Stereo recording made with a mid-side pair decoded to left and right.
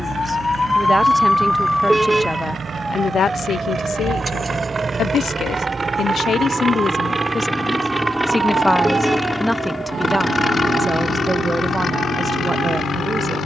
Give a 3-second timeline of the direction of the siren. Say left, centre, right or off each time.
centre, right, right, right, right.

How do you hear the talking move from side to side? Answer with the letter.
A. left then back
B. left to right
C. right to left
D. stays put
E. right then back
A.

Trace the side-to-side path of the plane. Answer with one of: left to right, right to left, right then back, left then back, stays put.
right to left.